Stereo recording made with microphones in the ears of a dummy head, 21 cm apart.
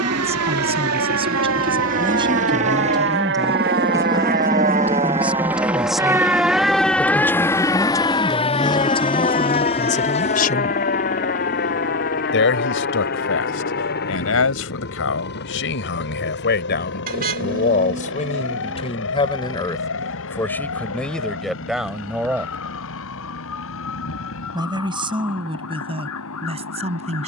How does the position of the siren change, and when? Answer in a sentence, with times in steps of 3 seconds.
In this clip you hear the siren on the right from 0 s, in the centre from 6 s and on the left from 9 s.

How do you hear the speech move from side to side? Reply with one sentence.
In this clip you hear the speech go left and come back.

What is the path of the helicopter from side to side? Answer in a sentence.
In this clip you hear the helicopter move to the left.